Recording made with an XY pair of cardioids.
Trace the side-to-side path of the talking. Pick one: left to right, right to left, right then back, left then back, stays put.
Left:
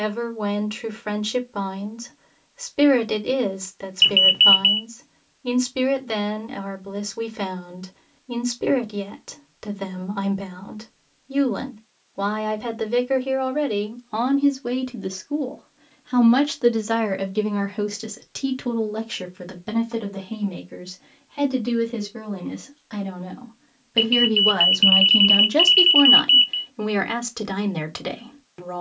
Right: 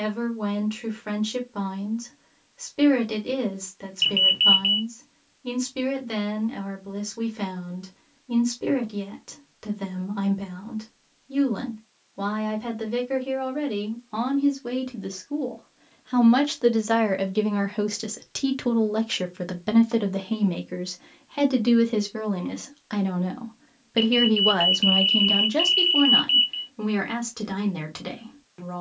right then back.